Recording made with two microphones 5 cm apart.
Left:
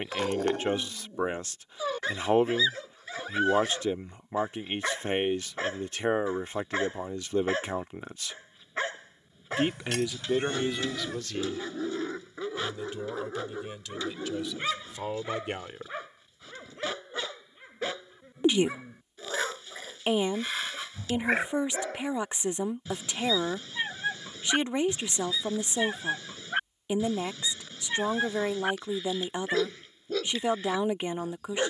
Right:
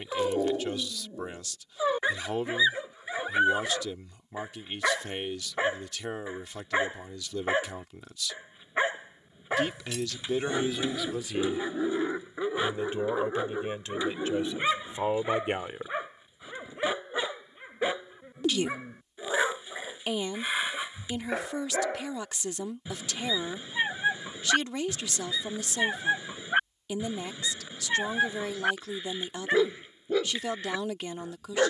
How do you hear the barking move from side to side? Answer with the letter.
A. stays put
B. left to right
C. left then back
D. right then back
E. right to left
A.